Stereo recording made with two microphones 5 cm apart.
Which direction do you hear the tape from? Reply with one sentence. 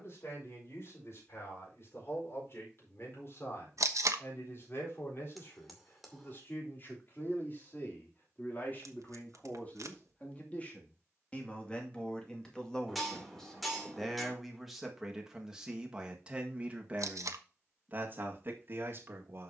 In this clip you hear the tape on the right.